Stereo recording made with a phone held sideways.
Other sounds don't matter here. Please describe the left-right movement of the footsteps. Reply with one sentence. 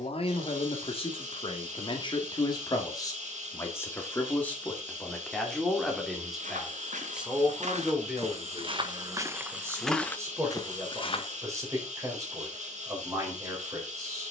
In this clip you hear the footsteps move to the left.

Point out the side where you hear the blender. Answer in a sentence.
In this clip you hear the blender on the right.